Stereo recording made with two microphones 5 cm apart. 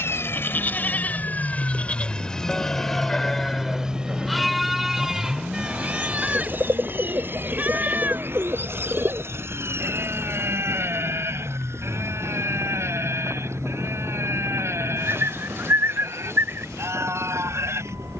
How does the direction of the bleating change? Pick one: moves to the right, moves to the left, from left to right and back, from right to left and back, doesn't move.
moves to the right.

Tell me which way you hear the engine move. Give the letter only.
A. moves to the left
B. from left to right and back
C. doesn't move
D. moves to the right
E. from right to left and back
D.